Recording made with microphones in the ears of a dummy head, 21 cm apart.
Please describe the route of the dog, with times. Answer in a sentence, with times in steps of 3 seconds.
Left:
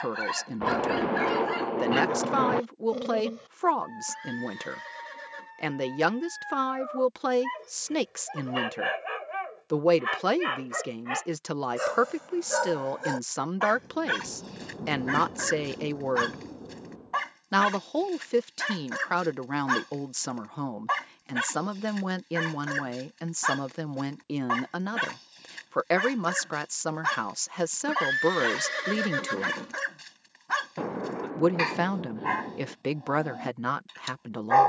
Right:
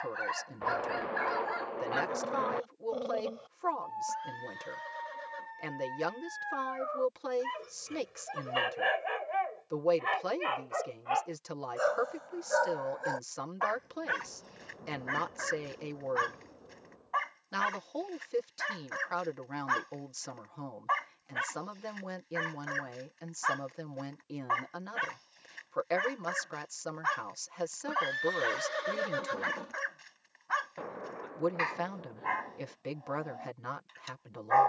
In this clip you hear the dog on the left from 0 s, in the centre from 6 s and on the left from 9 s.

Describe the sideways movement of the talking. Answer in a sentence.
In this clip you hear the talking stay in one place.